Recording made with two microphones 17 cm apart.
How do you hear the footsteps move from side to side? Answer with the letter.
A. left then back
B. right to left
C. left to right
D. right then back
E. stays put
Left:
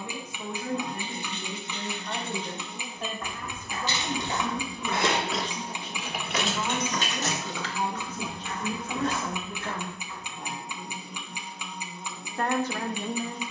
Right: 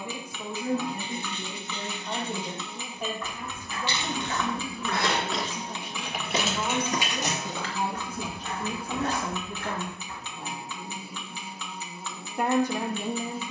C.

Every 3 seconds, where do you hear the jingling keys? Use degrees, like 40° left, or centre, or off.
70° left, 30° left, 10° right, off, off.